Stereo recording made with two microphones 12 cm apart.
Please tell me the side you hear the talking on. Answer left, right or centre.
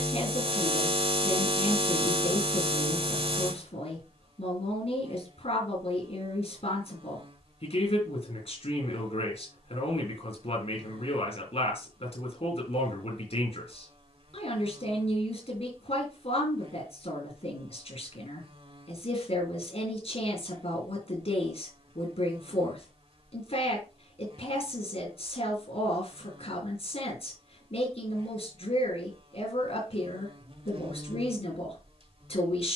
left.